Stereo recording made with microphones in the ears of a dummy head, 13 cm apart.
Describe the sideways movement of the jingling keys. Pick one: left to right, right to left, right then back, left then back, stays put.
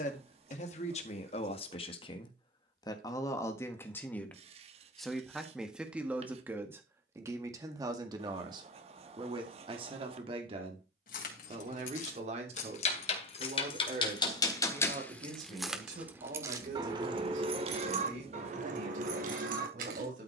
left to right.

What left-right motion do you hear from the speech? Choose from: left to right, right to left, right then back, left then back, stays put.
left to right.